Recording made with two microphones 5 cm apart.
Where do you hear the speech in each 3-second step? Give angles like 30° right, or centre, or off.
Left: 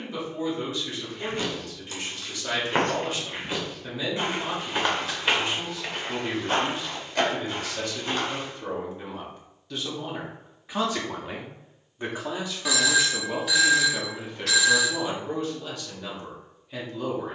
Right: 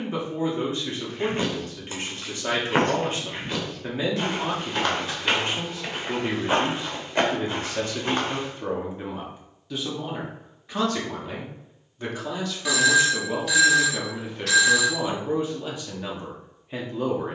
40° right, 40° right, 30° right, centre, centre, 20° right.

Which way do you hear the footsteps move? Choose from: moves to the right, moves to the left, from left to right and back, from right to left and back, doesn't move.
from right to left and back.